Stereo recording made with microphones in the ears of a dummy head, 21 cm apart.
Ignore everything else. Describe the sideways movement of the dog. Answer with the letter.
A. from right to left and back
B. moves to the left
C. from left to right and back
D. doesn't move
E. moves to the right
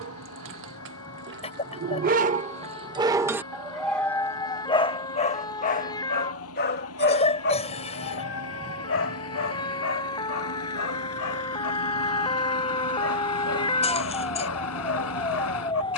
B.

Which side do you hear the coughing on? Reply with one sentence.
You can hear the coughing on the left.